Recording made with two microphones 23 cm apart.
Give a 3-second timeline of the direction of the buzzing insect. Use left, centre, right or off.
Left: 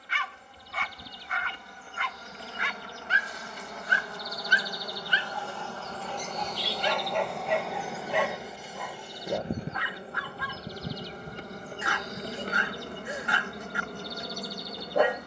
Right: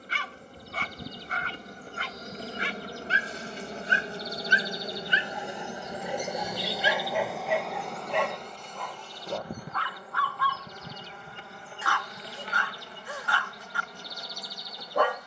right, right, centre, left, left.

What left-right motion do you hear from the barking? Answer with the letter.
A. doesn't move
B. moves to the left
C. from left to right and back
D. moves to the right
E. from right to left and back
B.